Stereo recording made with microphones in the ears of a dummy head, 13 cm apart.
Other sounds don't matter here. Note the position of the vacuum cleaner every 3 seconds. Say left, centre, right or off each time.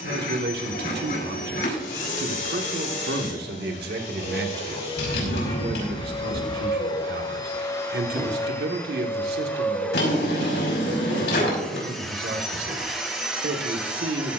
left, left, left, centre, centre.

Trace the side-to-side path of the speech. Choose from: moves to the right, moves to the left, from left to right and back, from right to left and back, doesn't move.
doesn't move.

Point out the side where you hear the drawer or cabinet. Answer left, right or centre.
left.